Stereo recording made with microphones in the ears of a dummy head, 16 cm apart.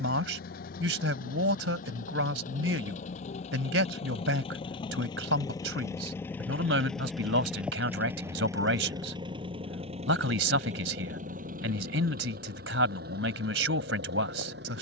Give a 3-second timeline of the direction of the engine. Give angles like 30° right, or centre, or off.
50° left, 30° left, centre, 40° right, 60° right.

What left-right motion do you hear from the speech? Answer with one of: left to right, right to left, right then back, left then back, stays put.
stays put.